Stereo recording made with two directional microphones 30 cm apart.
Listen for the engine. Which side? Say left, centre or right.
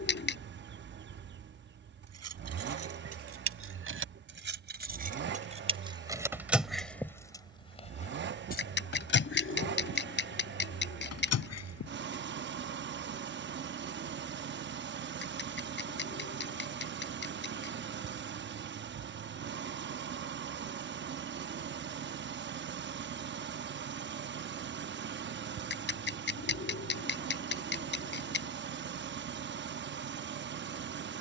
right.